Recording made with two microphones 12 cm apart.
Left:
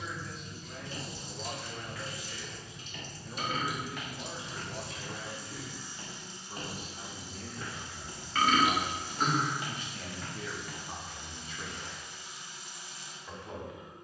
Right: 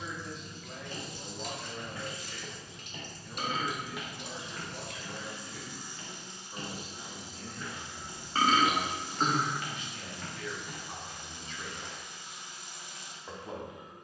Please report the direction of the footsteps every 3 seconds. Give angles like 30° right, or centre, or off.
40° right, centre, 50° left, centre, off.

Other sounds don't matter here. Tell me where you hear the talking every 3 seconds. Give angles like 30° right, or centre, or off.
10° right, 40° left, 60° left, 20° left, 20° right.